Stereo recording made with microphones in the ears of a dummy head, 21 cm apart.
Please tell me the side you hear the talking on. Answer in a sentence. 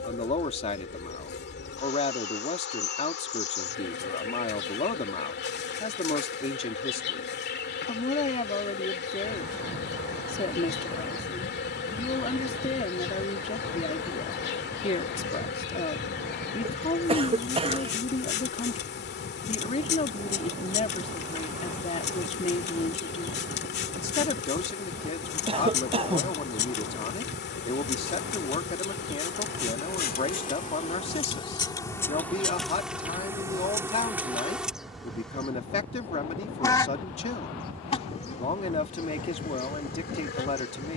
You can hear the talking on the left.